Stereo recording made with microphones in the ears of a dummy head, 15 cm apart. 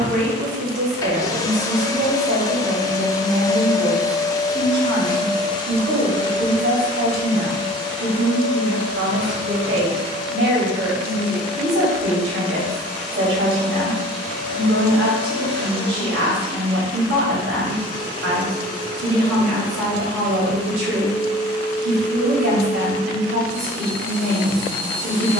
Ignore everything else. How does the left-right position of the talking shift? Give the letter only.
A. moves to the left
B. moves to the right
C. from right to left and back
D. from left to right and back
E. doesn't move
E.